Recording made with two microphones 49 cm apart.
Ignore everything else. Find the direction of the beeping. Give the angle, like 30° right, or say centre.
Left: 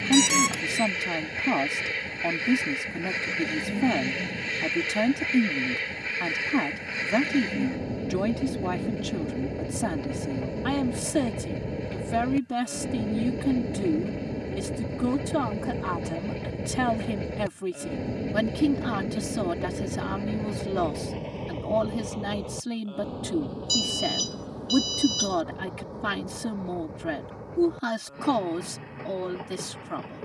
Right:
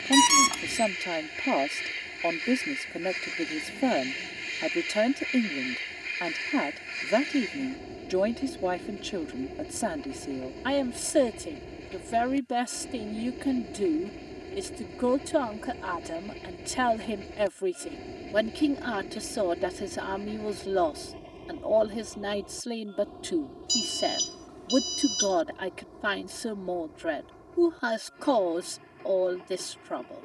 20° right.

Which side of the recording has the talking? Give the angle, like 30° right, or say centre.
20° left.